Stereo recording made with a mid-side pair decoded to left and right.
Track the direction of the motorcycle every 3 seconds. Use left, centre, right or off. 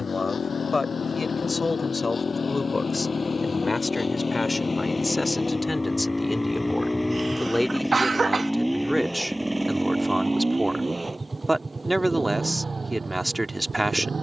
left, left, centre, right, right.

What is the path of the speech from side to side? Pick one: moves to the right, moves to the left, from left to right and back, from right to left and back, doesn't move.
moves to the right.